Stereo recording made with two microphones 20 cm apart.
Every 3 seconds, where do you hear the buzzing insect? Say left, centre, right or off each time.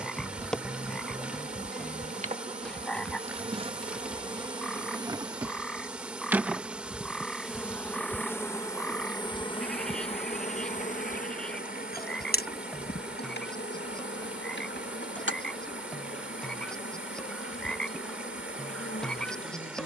right, right, centre, left, left, left, left.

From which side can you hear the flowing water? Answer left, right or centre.
centre.